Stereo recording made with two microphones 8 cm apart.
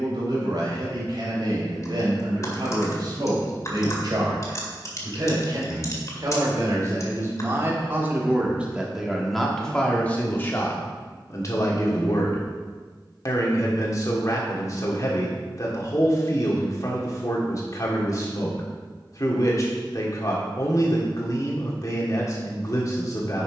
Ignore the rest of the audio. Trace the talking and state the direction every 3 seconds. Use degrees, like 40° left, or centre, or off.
60° right, 60° right, 30° right, 20° left, 40° left, 40° left, 40° left, 40° left.